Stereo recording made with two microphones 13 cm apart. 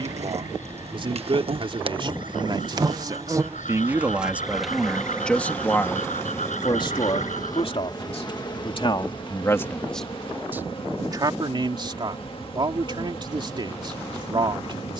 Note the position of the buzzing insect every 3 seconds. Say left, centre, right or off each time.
right, centre, left, left, left.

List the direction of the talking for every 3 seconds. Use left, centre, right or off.
right, centre, left, centre, right.